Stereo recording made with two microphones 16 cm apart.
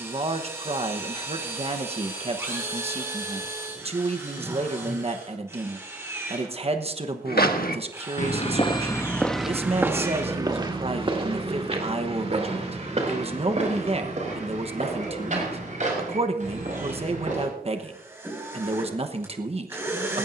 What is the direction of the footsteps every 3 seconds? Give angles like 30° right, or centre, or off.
off, off, 50° left, 20° right, 50° right, 50° right, off.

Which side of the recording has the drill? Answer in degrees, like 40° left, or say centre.
20° right.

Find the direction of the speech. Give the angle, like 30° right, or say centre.
40° right.